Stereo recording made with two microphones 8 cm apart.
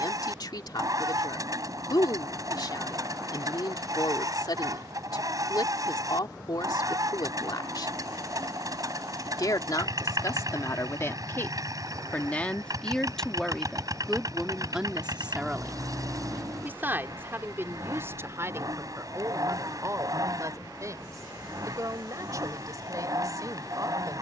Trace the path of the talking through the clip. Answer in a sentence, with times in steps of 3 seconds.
In this clip you hear the talking on the left from 0 s, in the centre from 12 s and on the right from 15 s.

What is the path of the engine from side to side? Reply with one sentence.
You can hear the engine stay put.